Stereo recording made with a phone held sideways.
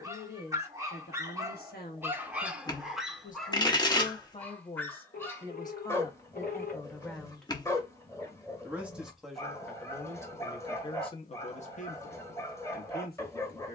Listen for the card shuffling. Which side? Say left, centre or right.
left.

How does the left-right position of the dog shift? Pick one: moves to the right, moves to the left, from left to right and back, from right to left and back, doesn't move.
moves to the left.